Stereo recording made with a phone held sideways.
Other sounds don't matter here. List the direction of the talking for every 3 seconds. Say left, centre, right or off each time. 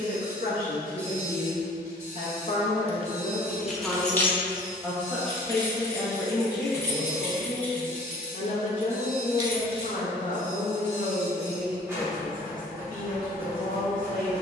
left, centre, left, left, left.